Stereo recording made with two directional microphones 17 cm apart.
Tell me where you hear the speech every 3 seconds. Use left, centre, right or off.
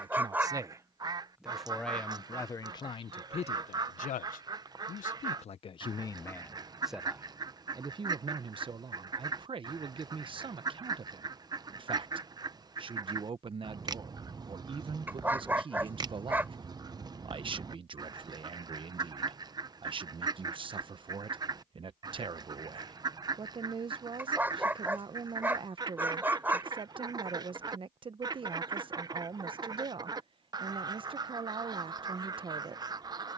centre, left, centre, right, right, right, right, right, right, right, right.